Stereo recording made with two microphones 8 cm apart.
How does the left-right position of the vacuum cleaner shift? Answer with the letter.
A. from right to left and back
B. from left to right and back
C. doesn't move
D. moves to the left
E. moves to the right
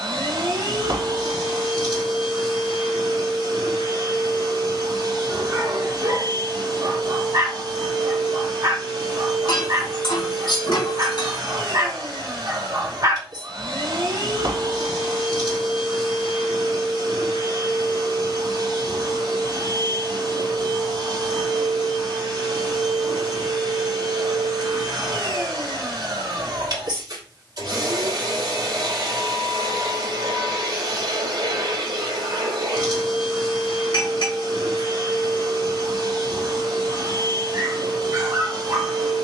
C.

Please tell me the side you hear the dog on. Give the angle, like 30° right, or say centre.
50° right.